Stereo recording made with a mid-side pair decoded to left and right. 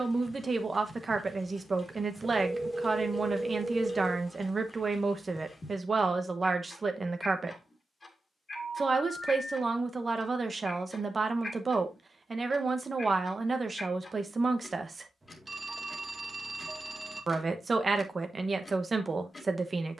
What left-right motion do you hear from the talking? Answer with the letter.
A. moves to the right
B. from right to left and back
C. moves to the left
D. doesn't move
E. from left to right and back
D.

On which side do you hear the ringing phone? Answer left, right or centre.
right.